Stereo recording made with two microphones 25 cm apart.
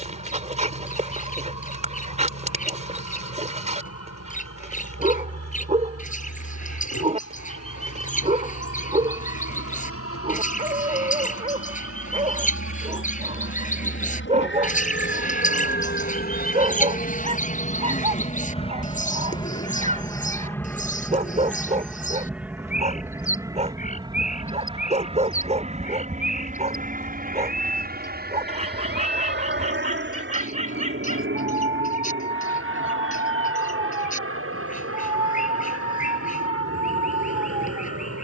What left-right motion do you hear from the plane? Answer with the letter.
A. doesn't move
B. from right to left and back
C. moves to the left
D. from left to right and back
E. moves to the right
E.